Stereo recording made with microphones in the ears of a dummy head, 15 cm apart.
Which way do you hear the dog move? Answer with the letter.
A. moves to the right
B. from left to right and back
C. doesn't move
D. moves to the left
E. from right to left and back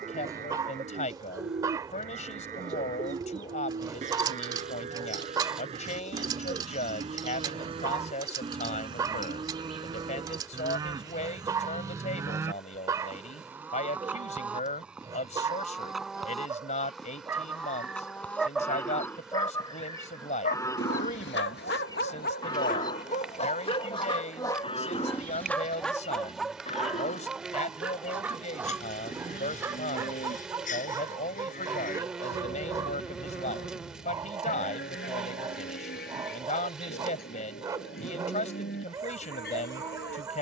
E.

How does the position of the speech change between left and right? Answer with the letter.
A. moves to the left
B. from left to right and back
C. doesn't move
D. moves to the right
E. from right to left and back
C.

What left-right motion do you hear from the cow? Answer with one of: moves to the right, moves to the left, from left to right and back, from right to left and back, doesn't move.
moves to the left.